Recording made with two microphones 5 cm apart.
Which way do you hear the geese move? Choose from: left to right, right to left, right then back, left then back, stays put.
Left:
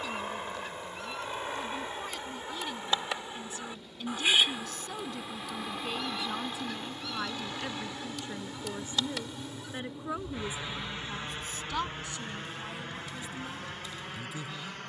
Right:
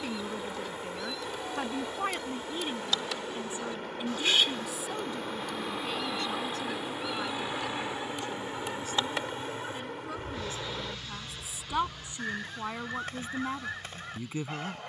left to right.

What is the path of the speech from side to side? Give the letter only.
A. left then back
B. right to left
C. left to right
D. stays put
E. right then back
A.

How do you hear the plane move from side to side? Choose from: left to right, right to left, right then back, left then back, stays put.
right to left.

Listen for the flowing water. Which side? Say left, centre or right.
right.